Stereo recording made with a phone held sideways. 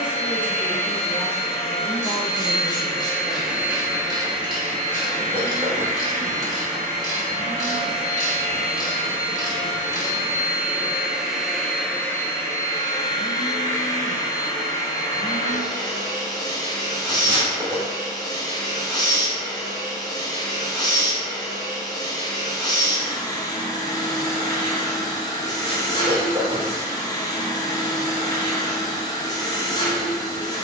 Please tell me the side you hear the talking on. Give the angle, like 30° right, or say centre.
10° left.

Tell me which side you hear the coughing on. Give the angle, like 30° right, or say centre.
30° right.